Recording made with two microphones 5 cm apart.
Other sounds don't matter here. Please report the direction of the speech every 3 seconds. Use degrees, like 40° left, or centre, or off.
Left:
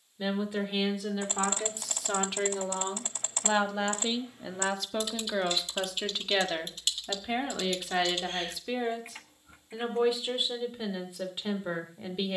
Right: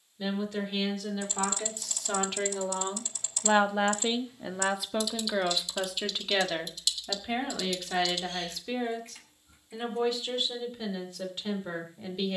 10° left, 10° right, 10° left, 10° left.